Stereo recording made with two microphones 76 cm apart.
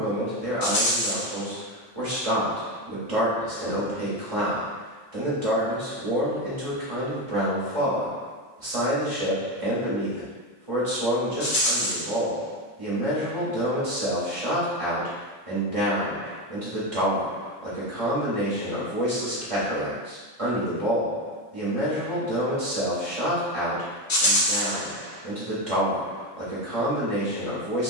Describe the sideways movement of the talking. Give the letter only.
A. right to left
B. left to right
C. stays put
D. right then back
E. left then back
C.